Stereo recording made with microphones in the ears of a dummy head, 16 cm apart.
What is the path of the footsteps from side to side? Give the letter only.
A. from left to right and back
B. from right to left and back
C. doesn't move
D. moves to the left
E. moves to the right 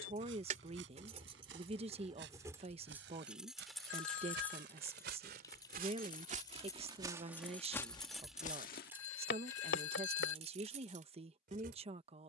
D.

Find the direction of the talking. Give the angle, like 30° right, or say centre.
30° right.